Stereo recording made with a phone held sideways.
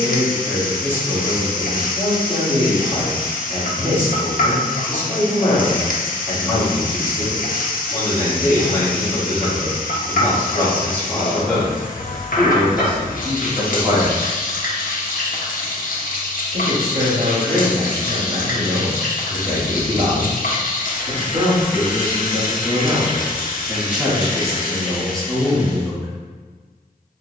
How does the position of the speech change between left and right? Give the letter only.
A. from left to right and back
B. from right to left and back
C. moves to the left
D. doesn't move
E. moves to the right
A.